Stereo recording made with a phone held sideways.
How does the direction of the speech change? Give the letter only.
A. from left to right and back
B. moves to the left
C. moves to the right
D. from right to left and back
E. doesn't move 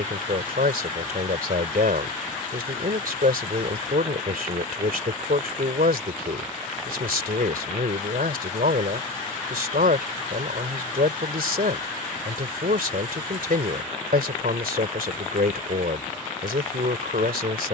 E.